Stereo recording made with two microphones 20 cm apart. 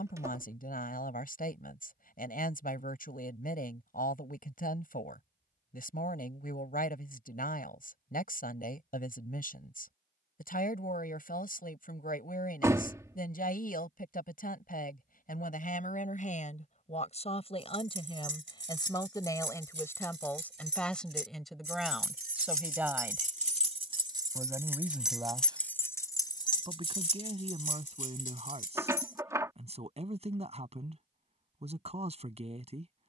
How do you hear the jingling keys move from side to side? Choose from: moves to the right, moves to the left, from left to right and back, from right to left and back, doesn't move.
moves to the left.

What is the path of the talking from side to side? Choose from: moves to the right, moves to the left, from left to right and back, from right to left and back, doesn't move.
moves to the right.